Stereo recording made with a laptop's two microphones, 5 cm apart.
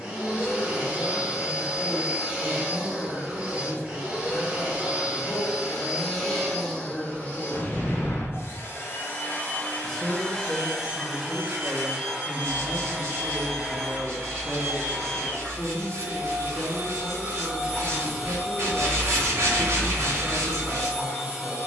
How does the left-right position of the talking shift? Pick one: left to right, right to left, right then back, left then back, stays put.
right then back.